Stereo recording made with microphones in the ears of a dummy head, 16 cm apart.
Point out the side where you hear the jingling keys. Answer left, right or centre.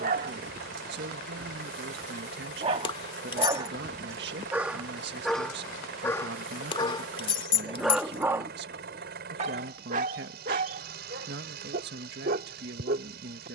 left.